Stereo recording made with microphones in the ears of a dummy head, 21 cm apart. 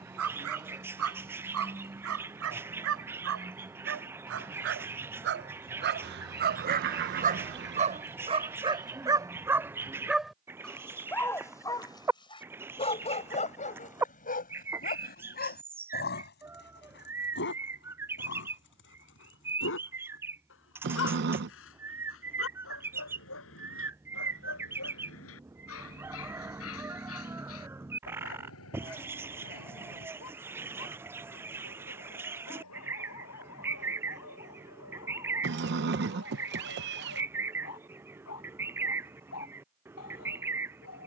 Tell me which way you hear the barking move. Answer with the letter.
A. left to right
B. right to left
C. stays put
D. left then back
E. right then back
B.